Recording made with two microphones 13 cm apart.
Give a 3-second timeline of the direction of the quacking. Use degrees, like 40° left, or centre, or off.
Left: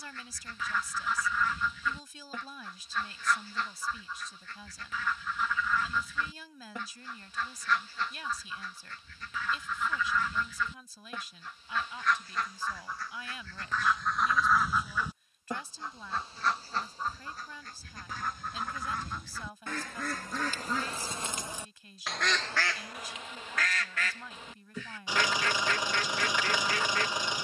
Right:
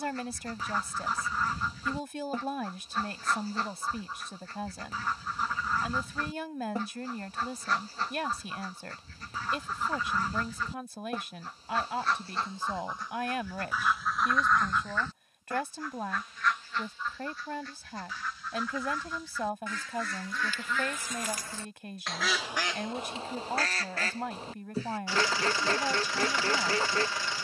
40° right, 40° right, 40° right, 40° right, 10° right, 30° left, 50° left, 10° right, 30° right.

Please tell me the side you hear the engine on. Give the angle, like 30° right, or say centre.
20° left.